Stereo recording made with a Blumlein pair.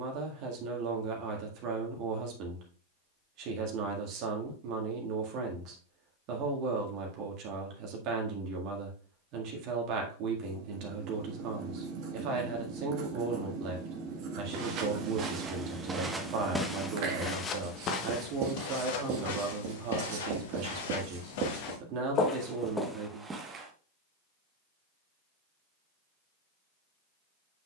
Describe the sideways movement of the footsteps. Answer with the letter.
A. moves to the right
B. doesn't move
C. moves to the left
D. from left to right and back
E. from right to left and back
E.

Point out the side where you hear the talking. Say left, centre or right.
right.